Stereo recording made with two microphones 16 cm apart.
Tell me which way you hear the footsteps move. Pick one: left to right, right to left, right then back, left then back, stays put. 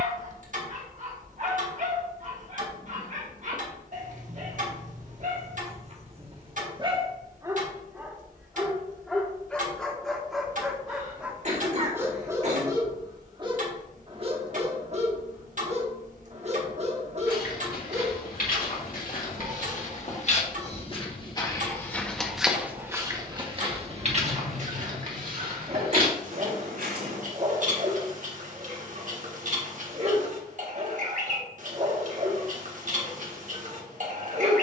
left to right.